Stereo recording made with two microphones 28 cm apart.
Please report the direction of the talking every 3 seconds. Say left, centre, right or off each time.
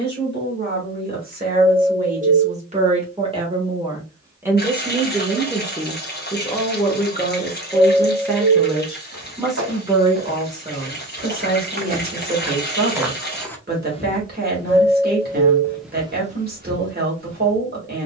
right, centre, centre, right, right, right.